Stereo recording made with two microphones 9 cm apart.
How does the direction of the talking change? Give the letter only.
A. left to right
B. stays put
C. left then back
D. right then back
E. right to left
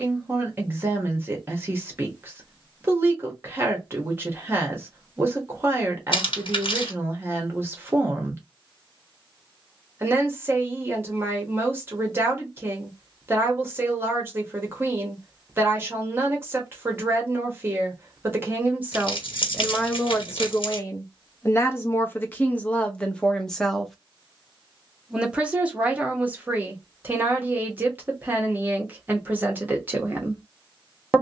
C.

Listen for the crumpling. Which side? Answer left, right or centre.
left.